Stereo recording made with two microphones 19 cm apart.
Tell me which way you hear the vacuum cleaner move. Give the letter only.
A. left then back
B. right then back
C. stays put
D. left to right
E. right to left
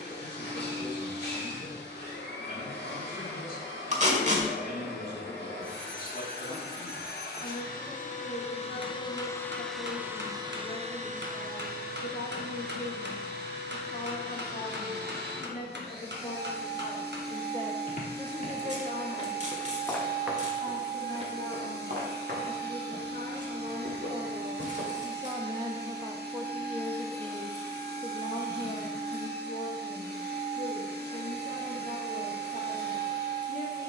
D.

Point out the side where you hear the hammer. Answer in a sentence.
In this clip you hear the hammer on the right.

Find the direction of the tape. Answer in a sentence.
You can hear the tape on the right.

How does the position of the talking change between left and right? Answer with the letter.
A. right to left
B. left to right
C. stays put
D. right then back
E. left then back
D.